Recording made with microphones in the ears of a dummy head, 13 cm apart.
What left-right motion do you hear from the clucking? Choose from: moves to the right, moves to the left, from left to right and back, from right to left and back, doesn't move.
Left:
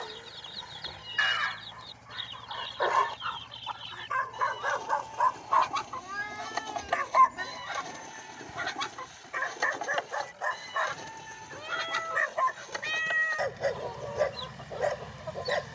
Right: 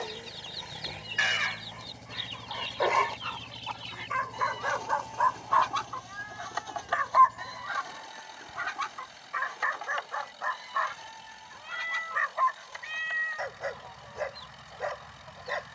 moves to the left.